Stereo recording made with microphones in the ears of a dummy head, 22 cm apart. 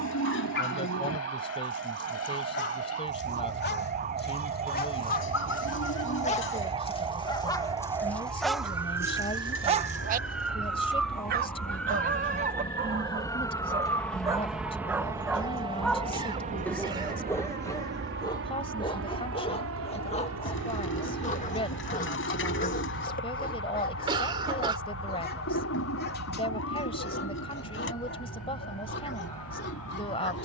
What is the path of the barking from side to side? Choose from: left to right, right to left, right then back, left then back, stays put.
right then back.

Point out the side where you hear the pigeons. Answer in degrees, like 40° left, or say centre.
50° left.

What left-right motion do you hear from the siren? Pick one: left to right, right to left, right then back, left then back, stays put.
right to left.